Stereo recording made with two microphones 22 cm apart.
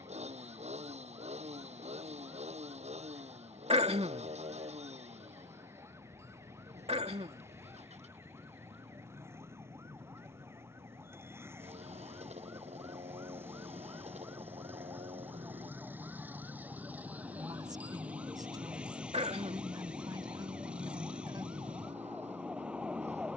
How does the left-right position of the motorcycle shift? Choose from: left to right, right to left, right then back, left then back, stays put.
stays put.